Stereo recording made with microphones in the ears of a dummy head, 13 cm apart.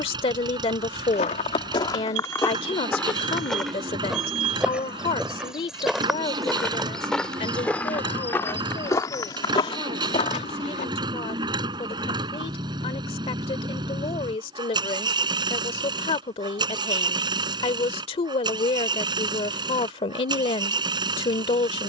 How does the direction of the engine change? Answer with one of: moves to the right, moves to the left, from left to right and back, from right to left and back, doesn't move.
doesn't move.